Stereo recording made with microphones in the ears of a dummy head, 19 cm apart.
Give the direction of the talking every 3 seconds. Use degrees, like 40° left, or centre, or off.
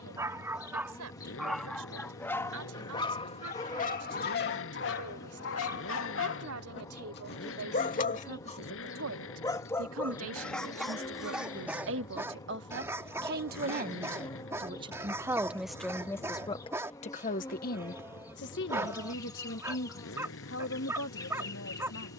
80° right, 80° right, 70° right, 60° right, 40° right, 20° left, 60° left, 70° left.